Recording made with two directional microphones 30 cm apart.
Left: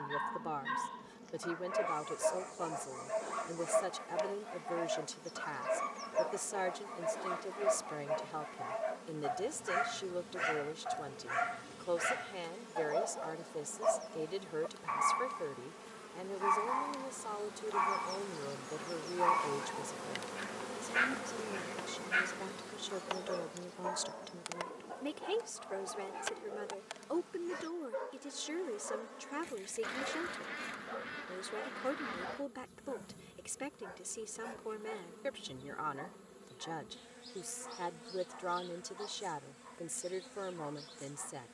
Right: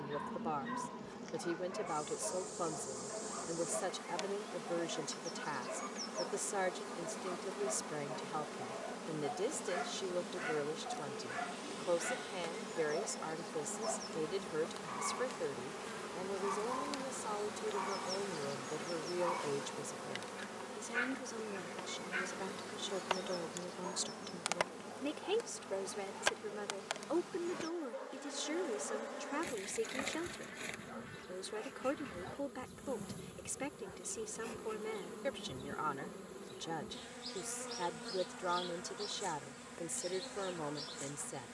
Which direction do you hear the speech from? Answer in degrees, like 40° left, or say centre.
centre.